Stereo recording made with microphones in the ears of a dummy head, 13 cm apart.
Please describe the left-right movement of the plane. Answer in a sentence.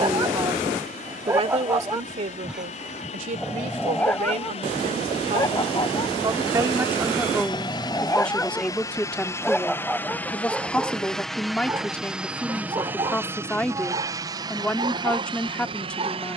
In this clip you hear the plane move to the right.